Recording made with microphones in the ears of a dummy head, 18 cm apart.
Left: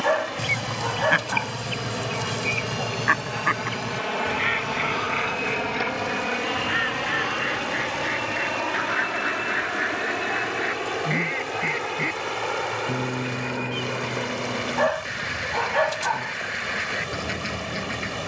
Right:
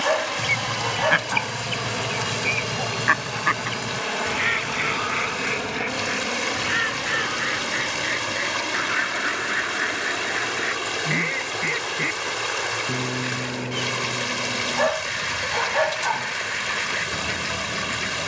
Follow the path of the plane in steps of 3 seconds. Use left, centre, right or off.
right, centre, left, left, left, left.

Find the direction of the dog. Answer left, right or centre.
centre.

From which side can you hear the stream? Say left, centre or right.
right.